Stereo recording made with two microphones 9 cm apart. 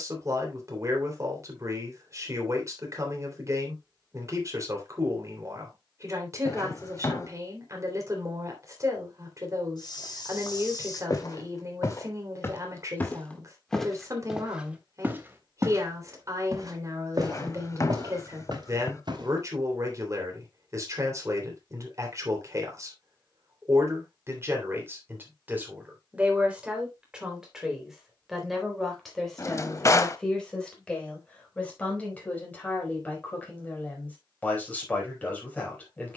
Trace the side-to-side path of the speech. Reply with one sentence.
You can hear the speech travel towards the left.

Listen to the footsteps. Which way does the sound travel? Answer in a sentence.
In this clip you hear the footsteps go from the left side to the right.